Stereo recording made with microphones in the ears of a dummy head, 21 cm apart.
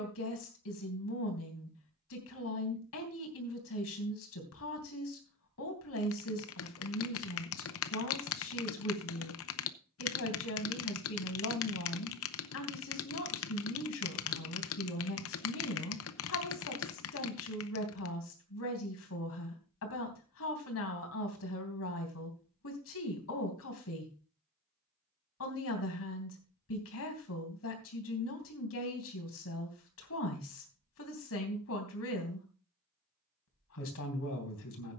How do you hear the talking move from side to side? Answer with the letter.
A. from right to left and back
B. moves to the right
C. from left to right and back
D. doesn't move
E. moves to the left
D.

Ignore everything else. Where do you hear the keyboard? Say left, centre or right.
left.